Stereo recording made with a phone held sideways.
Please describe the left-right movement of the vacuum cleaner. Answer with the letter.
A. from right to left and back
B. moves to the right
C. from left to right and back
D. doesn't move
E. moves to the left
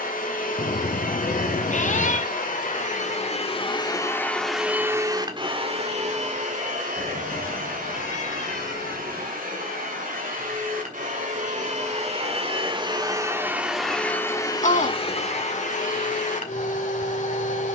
C.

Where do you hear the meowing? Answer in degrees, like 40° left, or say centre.
50° left.